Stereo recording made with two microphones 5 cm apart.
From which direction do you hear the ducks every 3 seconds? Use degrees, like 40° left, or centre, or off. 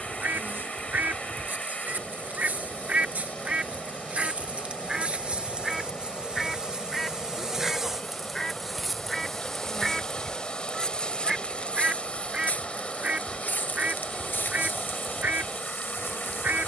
40° right, 20° right, centre, 10° right, 30° right, 40° right.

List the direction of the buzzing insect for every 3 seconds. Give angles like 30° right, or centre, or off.
40° right, 30° right, 10° right, 10° left, 40° left, 50° left.